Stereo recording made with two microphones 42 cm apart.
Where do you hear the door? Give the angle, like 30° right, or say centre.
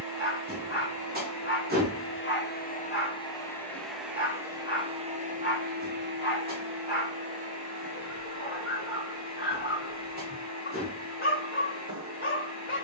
20° right.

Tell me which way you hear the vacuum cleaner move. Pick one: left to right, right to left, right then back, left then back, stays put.
left to right.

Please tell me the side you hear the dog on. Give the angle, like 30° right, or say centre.
30° left.